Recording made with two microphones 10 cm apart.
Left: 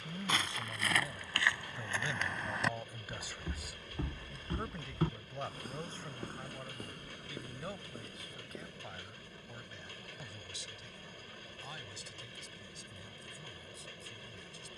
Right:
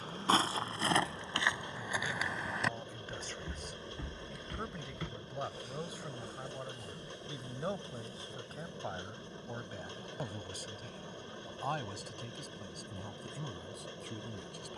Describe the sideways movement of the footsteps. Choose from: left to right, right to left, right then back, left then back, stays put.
right to left.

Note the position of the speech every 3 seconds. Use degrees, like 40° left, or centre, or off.
20° left, centre, 20° right, 50° right, 60° right.